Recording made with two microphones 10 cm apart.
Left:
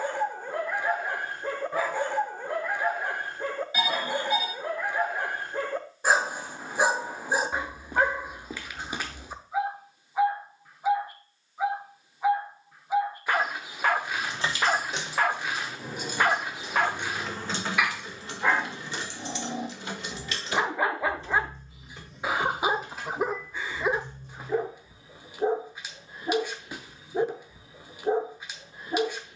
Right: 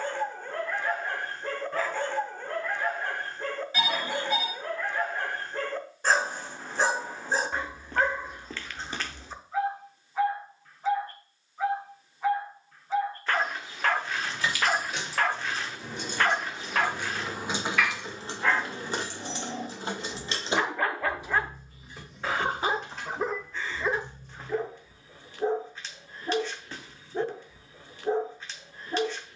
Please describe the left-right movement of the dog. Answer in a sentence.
You can hear the dog stay put.